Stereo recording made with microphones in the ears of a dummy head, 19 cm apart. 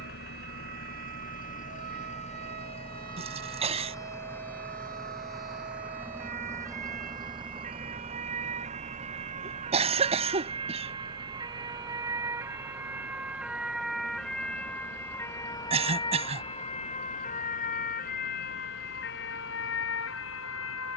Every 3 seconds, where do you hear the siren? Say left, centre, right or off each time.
right, right, right, right, centre, left, left.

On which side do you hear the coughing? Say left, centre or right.
right.